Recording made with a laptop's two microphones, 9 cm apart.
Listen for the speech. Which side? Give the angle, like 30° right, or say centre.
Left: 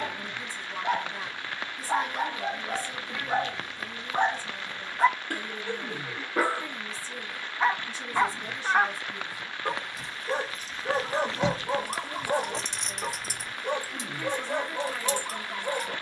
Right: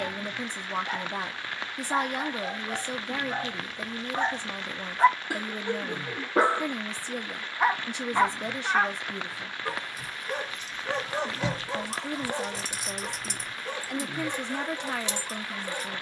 70° right.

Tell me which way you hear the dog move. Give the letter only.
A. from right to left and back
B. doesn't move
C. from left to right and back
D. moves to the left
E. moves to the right
C.